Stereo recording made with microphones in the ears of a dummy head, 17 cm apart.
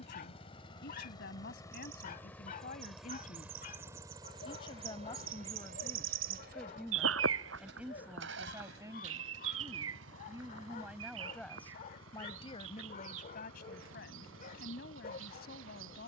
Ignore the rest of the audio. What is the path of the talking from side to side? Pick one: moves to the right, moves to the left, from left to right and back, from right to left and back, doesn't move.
from left to right and back.